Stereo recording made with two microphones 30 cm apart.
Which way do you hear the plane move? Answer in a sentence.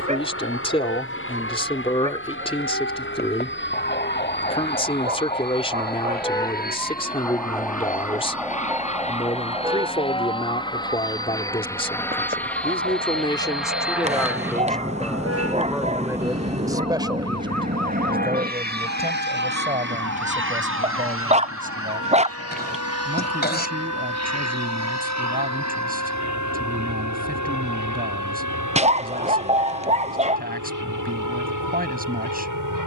You can hear the plane travel towards the right.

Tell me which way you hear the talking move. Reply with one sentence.
In this clip you hear the talking move to the right.